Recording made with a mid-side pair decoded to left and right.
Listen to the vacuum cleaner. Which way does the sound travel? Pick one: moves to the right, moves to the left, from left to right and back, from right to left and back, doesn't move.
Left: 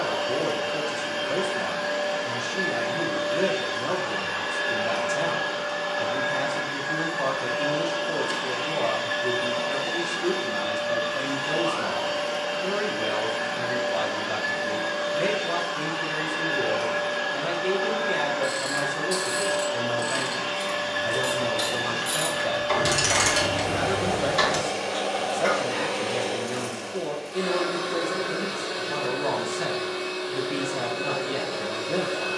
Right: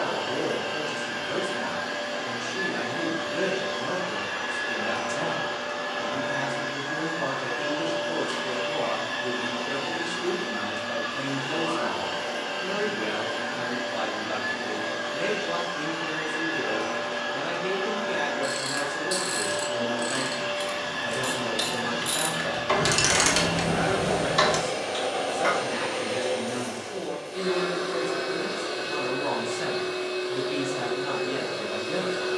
doesn't move.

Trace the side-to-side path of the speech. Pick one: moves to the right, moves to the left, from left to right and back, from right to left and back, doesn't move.
doesn't move.